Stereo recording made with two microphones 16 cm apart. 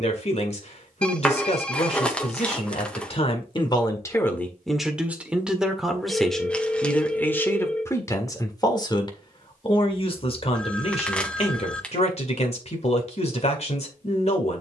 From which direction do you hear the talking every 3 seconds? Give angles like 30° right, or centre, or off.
50° left, 10° left, 10° left, 40° left, 50° left.